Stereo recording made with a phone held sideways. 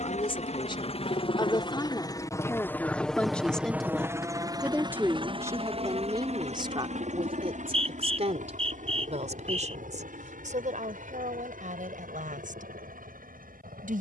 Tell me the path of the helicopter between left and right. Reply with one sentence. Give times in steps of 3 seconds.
You can hear the helicopter on the left from 0 s and on the right from 3 s.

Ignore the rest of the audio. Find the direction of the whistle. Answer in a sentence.
You can hear the whistle on the right.